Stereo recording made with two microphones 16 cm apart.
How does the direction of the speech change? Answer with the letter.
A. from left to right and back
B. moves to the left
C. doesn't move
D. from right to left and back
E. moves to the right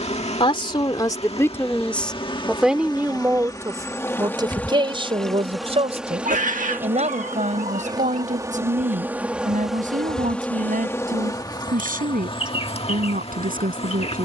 E.